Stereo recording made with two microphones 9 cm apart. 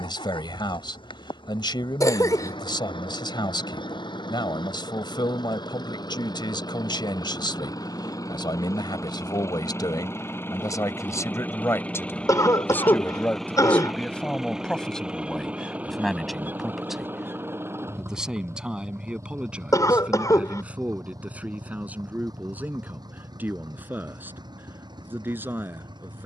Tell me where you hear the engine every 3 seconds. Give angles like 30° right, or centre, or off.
60° left, 60° left, 40° left, 20° left, centre, 20° right, 30° right, 40° right, 50° right.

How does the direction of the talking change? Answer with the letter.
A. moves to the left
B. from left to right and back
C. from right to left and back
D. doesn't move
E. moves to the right
E.